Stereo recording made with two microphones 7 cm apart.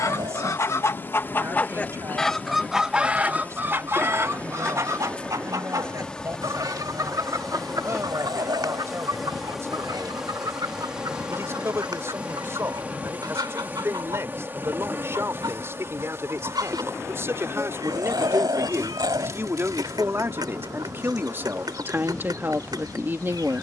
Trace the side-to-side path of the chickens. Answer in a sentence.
You can hear the chickens move to the right.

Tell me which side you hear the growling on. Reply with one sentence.
You can hear the growling on the right.